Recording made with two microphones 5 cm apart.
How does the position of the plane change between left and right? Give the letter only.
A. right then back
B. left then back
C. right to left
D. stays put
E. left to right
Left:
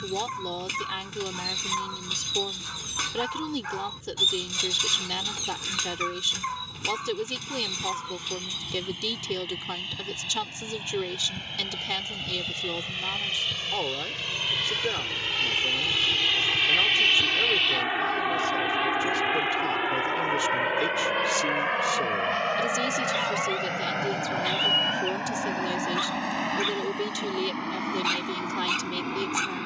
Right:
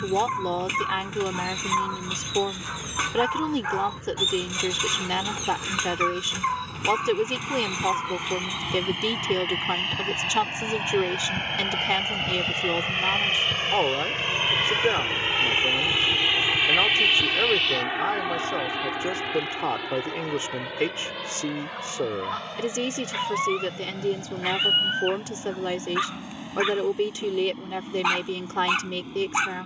C.